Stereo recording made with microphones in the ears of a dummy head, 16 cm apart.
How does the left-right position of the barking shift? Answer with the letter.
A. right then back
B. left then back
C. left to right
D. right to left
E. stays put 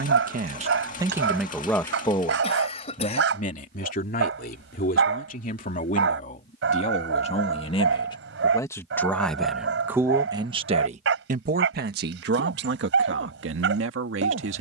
E.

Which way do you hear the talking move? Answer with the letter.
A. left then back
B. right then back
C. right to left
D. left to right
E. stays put
A.